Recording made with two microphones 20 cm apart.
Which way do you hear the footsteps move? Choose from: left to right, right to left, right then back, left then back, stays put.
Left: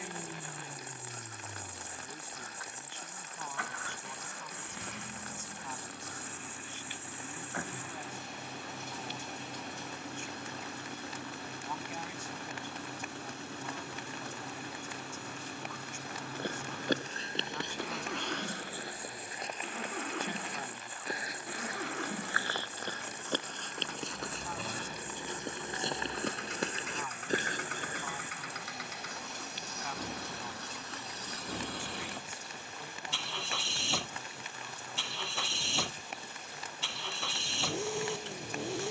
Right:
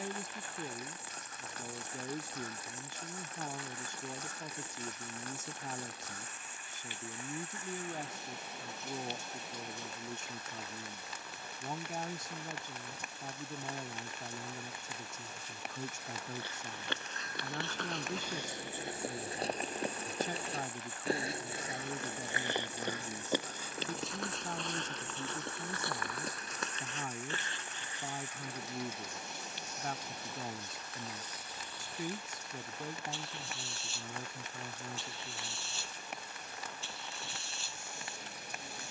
right then back.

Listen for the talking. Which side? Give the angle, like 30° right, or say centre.
40° right.